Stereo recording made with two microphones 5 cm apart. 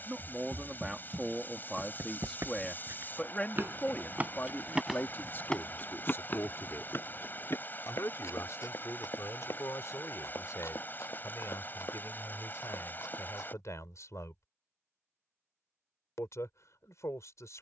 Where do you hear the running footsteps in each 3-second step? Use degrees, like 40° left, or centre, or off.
70° right, 10° right, 50° left, 70° left, 80° left, off.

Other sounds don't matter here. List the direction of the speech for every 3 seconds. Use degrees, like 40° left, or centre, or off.
centre, 40° left, 60° left, 70° left, 70° left, 70° left.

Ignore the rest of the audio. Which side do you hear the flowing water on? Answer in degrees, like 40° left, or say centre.
40° left.